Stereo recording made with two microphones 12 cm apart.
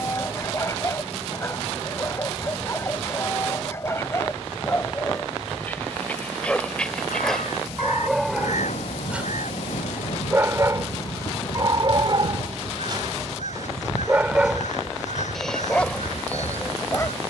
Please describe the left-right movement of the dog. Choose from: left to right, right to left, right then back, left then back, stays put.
right then back.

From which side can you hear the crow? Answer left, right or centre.
left.